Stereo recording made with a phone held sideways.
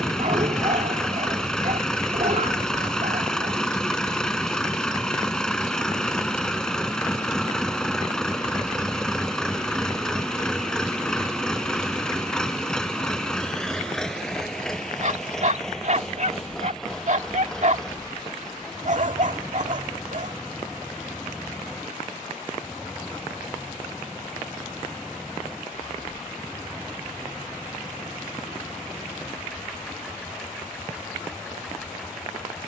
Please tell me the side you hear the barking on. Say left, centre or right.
right.